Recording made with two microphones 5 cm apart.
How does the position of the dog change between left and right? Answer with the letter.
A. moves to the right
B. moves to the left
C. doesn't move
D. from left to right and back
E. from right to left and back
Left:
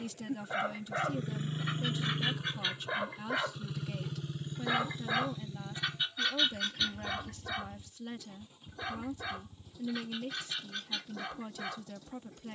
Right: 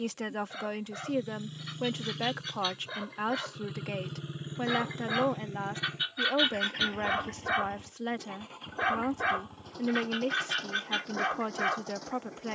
A.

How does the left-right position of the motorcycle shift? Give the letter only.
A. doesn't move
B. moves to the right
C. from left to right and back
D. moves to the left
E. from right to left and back
B.